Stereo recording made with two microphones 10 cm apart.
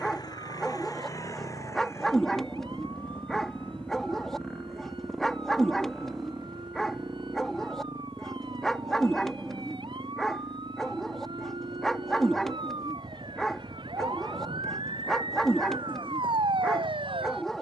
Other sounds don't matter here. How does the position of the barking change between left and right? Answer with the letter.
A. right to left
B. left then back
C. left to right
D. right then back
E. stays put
E.